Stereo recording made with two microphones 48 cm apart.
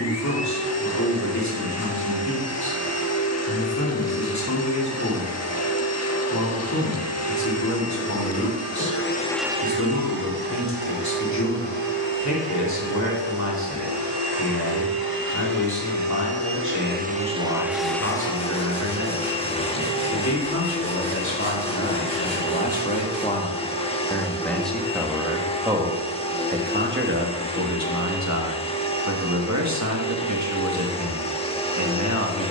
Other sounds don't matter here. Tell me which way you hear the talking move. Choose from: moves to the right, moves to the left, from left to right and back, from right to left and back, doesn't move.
moves to the right.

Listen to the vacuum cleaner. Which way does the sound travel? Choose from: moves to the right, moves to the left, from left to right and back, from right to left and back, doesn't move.
from left to right and back.